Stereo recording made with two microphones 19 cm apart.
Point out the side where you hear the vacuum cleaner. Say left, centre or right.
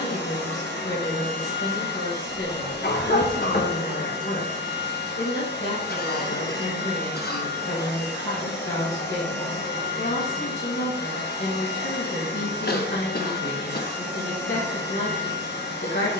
left.